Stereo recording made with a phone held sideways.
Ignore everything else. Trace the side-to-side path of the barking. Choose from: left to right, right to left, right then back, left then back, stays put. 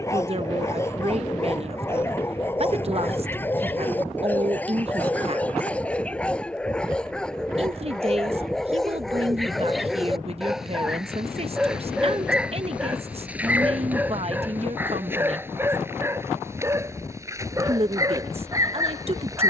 left to right.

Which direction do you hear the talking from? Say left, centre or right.
right.